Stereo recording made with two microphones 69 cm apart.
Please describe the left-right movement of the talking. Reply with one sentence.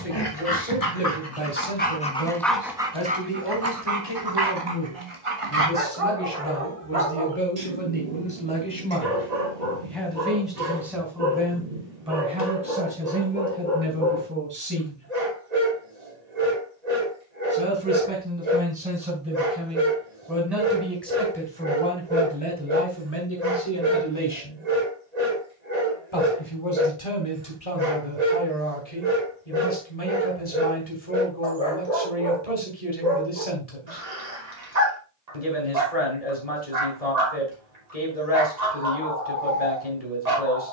You can hear the talking go right and come back.